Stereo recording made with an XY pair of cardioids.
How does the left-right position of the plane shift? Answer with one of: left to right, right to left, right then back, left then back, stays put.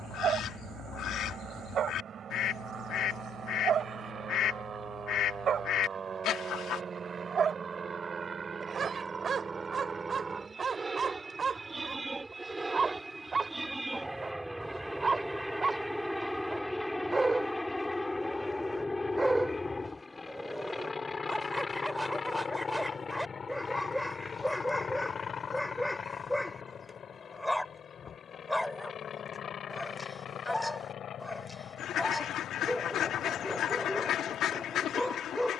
right to left.